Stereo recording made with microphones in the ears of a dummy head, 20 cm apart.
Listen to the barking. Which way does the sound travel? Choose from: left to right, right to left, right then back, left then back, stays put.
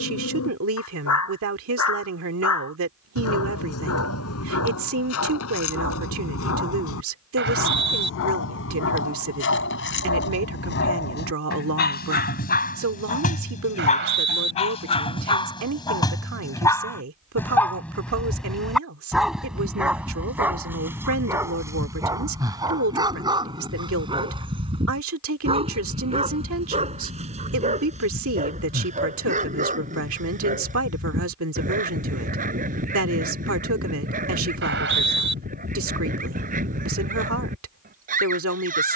left to right.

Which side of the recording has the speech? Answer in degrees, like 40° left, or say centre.
70° right.